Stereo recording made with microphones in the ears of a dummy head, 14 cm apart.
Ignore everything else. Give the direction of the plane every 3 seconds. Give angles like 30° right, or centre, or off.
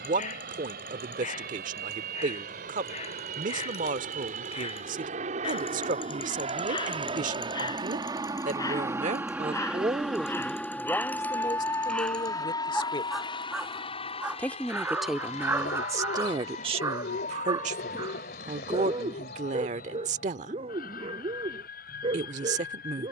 70° right, 60° right, 30° right, centre, 30° left, 50° left, 60° left, 60° left.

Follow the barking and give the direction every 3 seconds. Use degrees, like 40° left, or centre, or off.
50° left, 40° left, 30° left, 10° left, centre, 20° right, 30° right, 40° right.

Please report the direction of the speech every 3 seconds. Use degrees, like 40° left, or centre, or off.
60° right, 60° right, 60° right, 10° right, 20° left, 30° right, 50° right, 50° right.